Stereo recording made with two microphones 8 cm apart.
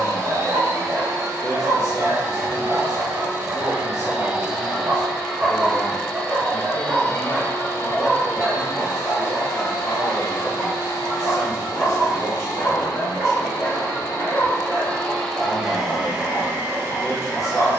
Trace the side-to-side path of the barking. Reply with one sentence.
You can hear the barking go from the right side to the left.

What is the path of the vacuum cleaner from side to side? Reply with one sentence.
You can hear the vacuum cleaner go left and come back.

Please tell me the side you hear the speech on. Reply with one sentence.
You can hear the speech on the left.